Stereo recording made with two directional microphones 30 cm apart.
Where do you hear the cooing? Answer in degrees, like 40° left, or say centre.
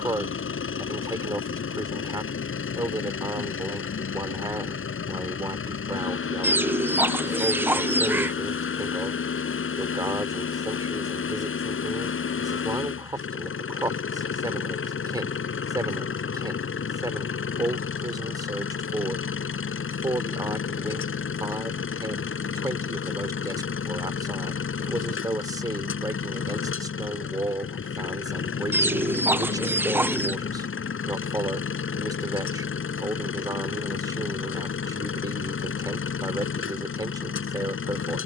10° right.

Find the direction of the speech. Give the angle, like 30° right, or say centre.
10° right.